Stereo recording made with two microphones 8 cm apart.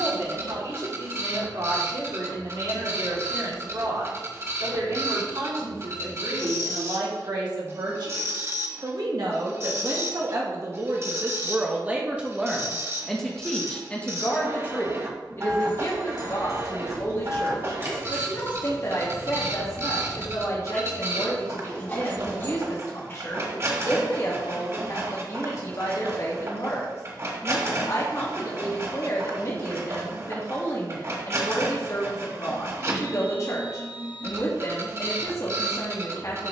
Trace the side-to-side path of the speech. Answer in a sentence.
You can hear the speech move from right to left.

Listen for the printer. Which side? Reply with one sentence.
You can hear the printer on the right.